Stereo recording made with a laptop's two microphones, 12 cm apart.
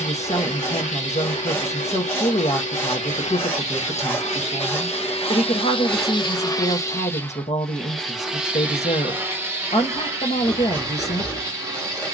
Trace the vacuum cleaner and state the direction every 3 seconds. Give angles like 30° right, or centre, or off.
80° left, 70° left, 10° left, 30° right.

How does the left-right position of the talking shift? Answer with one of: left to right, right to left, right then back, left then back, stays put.
stays put.